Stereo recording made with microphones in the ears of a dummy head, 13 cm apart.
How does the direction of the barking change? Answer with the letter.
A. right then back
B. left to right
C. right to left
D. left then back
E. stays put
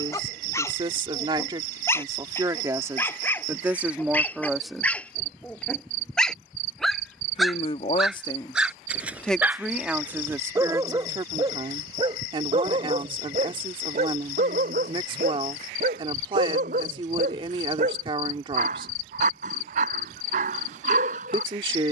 B.